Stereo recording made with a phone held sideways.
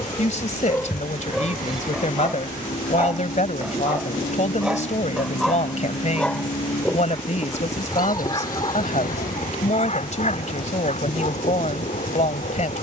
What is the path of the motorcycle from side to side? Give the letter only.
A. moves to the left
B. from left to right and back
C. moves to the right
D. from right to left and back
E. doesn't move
E.